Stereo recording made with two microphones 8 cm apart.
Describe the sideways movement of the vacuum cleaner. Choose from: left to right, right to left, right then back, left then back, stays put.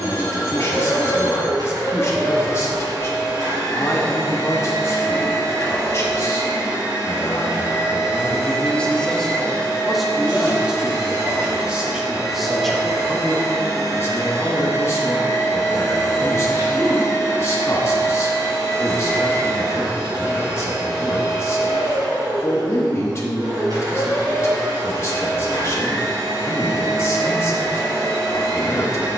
stays put.